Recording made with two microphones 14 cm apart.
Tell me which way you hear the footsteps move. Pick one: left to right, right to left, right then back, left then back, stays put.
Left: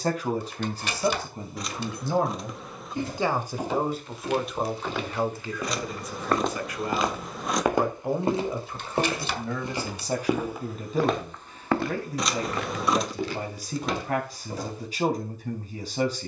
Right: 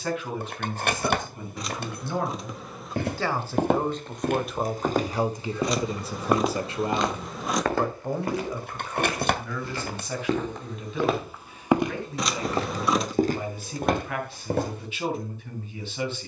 left then back.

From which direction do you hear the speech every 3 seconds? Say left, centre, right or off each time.
left, centre, centre, left, left, left.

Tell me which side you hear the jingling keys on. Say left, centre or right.
right.